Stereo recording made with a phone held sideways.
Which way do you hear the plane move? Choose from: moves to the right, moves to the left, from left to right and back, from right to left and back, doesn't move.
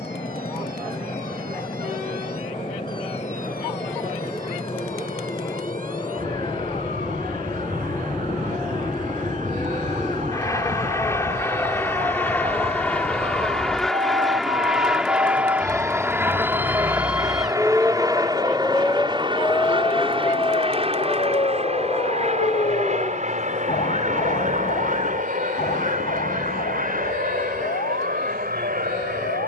moves to the right.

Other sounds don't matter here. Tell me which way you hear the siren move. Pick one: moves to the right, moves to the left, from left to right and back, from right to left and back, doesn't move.
moves to the left.